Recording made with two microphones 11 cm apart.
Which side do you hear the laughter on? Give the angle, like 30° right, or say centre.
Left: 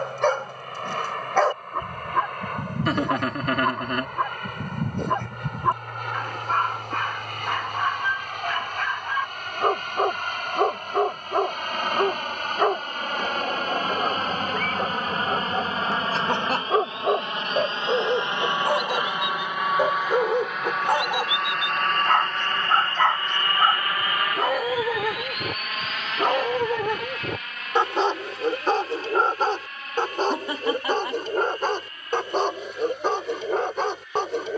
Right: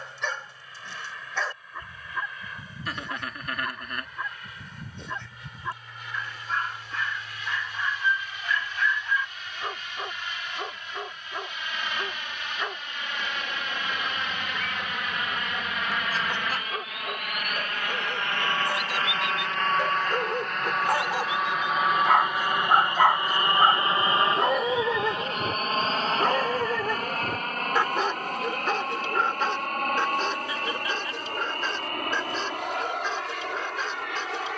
70° left.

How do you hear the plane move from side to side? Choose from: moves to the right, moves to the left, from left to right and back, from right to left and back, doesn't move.
moves to the right.